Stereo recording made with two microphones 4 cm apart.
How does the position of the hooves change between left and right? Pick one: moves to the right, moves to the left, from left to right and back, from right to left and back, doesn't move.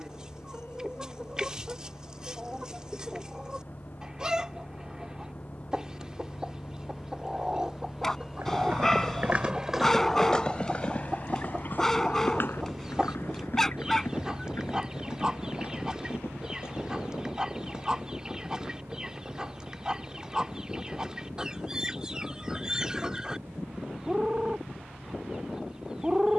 moves to the left.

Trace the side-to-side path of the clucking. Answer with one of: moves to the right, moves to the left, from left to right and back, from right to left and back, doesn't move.
doesn't move.